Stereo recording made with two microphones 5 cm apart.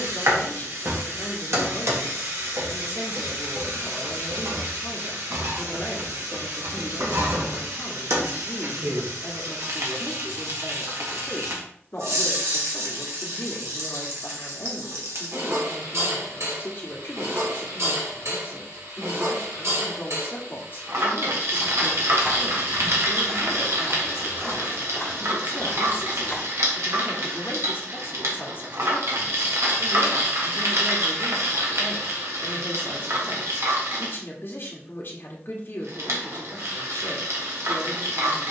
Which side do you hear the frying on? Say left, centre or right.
right.